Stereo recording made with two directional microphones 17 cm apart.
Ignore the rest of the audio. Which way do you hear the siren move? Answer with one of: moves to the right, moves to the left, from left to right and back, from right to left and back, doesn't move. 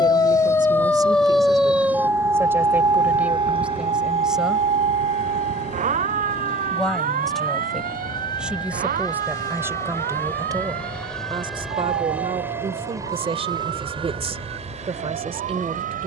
moves to the right.